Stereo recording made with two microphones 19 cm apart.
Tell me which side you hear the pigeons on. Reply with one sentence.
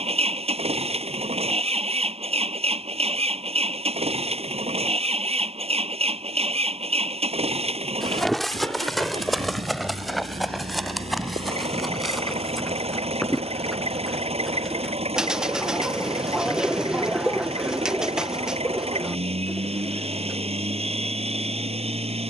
In this clip you hear the pigeons in the centre.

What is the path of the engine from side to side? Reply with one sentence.
You can hear the engine stay in one place.